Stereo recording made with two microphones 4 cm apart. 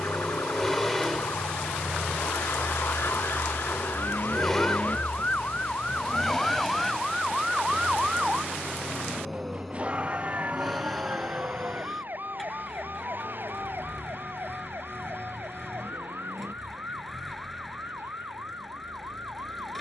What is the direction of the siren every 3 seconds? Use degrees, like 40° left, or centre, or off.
70° left, 40° left, centre, 30° right, 50° right, 60° right, 60° right.